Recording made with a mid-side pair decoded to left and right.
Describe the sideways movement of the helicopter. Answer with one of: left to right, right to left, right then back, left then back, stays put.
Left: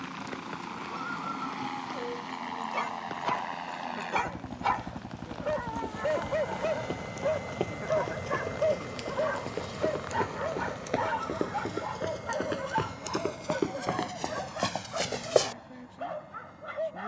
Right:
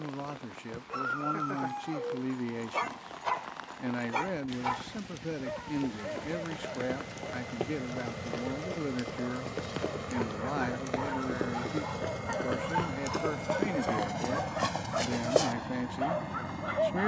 left to right.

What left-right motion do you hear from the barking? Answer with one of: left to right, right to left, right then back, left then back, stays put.
left then back.